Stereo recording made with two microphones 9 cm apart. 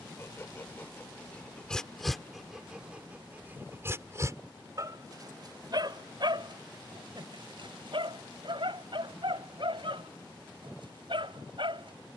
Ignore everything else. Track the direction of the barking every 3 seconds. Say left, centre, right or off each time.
centre, right, right, right.